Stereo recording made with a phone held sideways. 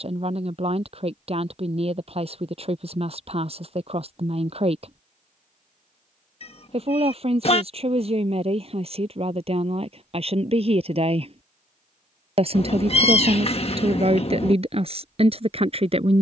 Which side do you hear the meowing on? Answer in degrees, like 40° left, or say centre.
40° left.